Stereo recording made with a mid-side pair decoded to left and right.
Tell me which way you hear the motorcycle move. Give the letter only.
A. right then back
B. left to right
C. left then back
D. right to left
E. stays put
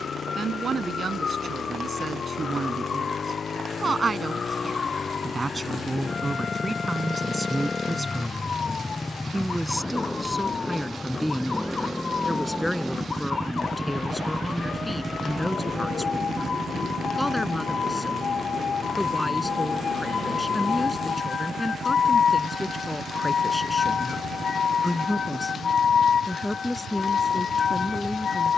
B.